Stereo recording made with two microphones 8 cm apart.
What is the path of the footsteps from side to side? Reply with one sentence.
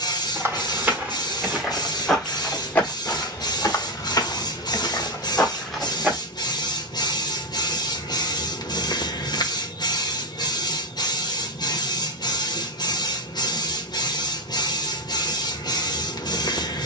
In this clip you hear the footsteps go left and come back.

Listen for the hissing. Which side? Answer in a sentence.
In this clip you hear the hissing on the left.